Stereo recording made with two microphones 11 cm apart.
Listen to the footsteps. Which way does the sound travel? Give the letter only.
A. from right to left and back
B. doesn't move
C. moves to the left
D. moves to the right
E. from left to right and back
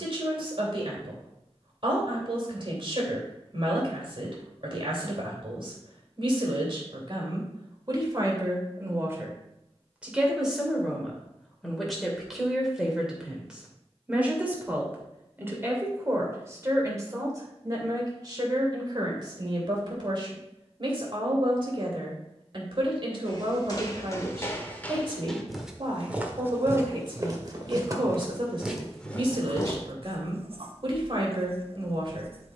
E.